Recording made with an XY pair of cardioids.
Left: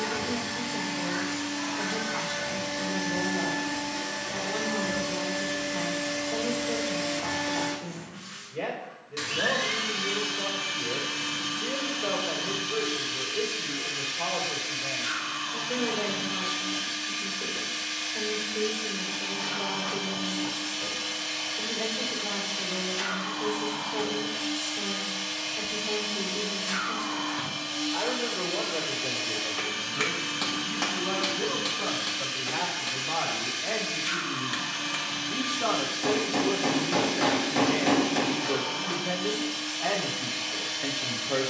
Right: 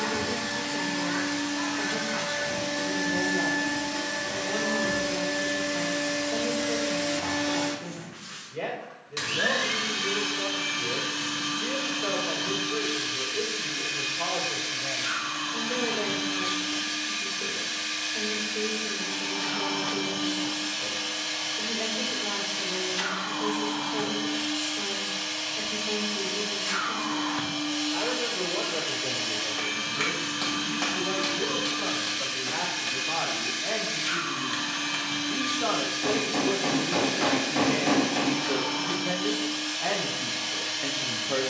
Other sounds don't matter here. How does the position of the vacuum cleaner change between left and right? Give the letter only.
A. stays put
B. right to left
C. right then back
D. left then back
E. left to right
A.